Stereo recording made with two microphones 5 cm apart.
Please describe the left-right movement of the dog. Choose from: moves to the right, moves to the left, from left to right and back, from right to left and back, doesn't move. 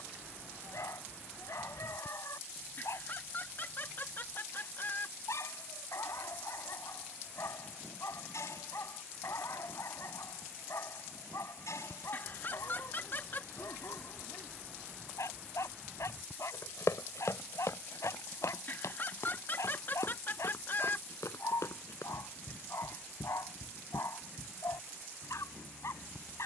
doesn't move.